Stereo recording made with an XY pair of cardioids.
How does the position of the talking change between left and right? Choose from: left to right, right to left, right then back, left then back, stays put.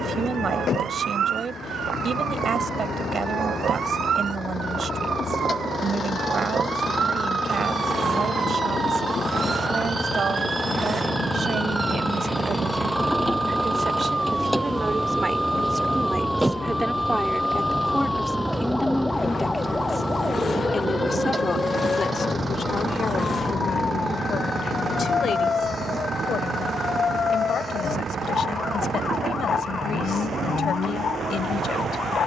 right to left.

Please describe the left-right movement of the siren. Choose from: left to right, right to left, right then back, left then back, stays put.
right to left.